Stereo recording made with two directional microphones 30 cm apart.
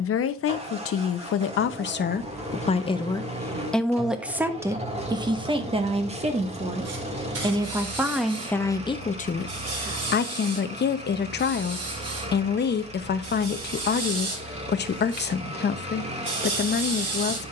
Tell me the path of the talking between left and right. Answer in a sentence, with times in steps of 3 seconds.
In this clip you hear the talking on the left from 0 s, in the centre from 3 s and on the left from 9 s.